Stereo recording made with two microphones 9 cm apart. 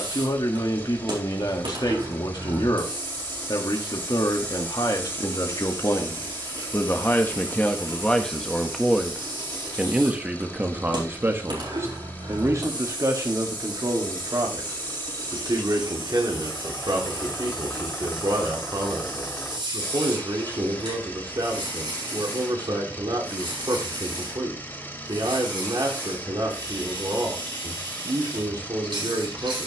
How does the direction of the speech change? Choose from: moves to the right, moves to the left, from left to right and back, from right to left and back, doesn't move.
moves to the right.